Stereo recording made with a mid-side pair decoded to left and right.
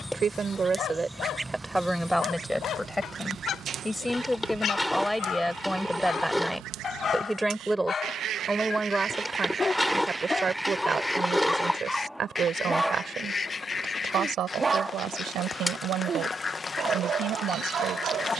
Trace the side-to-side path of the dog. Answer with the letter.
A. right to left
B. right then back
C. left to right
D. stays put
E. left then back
C.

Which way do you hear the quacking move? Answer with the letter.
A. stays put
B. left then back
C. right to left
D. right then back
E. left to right
D.